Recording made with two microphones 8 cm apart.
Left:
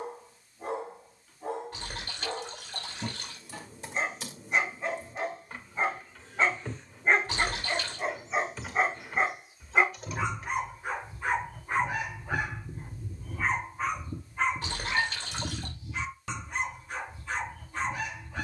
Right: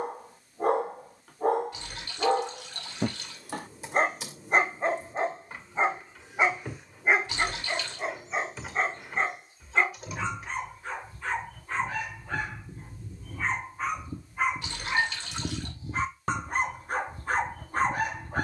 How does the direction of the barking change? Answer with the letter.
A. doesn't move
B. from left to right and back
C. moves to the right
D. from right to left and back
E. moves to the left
D.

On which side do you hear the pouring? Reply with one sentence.
In this clip you hear the pouring on the left.